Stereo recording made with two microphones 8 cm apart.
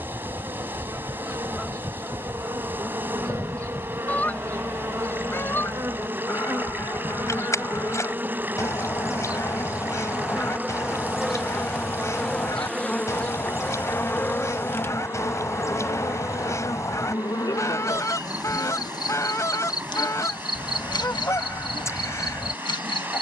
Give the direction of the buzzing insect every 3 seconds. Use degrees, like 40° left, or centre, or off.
50° right, 40° right, 30° right, 10° right, 20° left, 40° left, 60° left, 70° left.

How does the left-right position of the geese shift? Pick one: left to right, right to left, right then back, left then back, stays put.
right to left.